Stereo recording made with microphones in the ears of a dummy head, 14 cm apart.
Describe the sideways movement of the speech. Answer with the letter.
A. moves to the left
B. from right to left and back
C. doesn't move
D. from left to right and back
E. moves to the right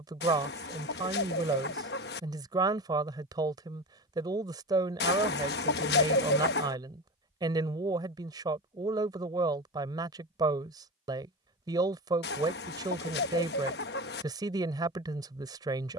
C.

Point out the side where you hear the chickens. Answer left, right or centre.
left.